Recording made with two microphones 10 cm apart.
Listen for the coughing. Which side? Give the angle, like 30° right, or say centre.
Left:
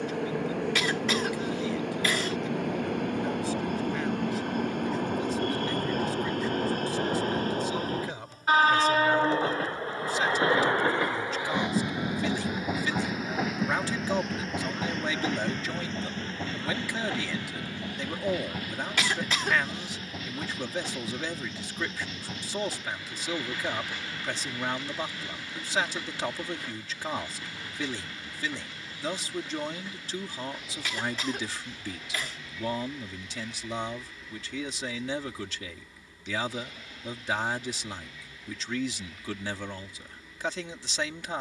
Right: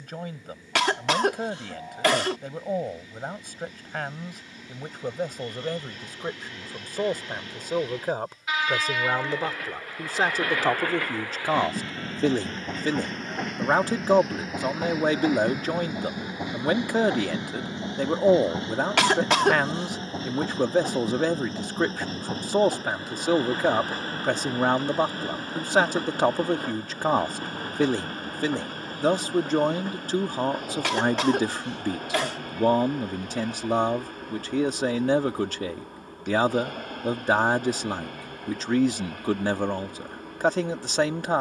70° right.